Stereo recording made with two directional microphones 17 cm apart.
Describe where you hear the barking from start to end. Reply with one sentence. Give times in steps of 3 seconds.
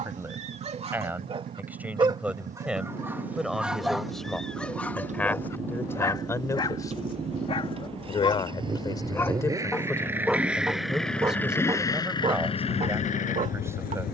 In this clip you hear the barking on the right from 0 s, in the centre from 3 s, on the left from 6 s, in the centre from 9 s and on the right from 12 s.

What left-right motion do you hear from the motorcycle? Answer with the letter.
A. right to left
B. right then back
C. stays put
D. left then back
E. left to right
A.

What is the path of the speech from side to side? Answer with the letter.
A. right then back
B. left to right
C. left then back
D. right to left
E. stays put
C.